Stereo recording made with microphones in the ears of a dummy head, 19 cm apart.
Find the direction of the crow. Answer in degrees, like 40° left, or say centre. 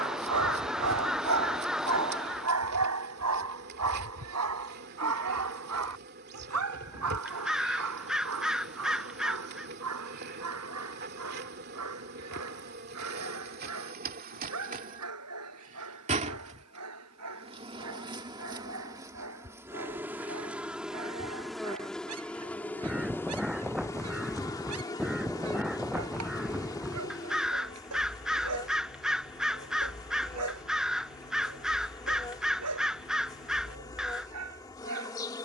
centre.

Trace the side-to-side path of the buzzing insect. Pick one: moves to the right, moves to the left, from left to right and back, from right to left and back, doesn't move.
moves to the left.